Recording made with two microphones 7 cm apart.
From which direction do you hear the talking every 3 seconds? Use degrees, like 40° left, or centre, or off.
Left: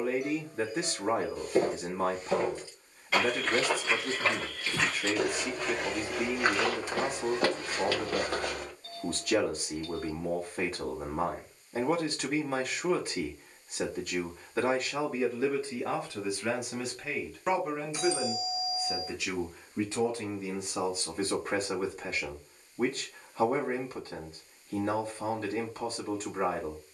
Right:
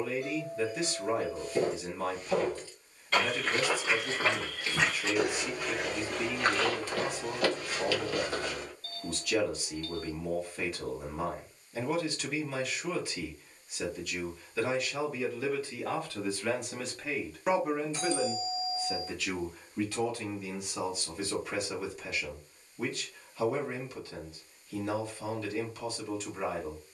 40° left, 40° left, 40° left, 40° left, 40° left, 10° left, 20° left, 40° left, 40° left.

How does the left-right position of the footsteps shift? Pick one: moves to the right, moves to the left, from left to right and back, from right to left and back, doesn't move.
from left to right and back.